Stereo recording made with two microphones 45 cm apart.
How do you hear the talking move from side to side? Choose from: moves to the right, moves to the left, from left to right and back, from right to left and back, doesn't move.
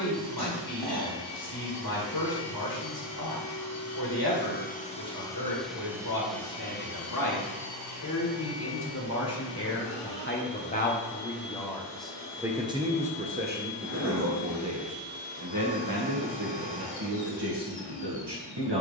moves to the right.